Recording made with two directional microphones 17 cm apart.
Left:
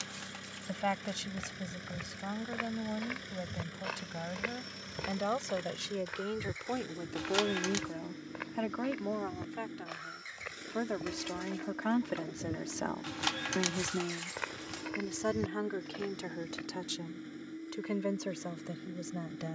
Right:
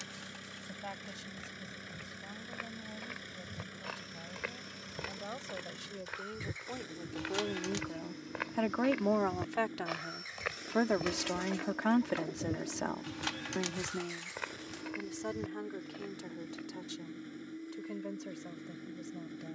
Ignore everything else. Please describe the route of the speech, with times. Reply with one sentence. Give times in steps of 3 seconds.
You can hear the speech on the left from 0 s, on the right from 9 s, in the centre from 12 s and on the left from 15 s.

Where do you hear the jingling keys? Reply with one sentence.
You can hear the jingling keys on the left.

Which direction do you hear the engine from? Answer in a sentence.
In this clip you hear the engine in the centre.